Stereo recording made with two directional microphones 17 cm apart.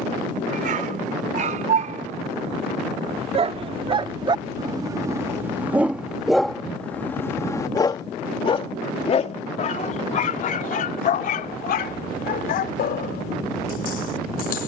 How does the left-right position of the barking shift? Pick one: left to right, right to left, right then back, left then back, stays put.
right to left.